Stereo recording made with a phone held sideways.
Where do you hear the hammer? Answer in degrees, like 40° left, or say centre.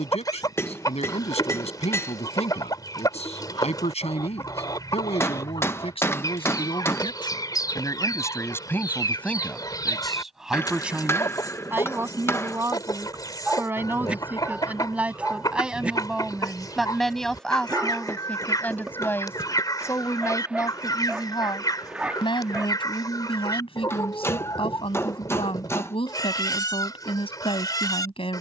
20° left.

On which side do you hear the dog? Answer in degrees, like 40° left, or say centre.
10° right.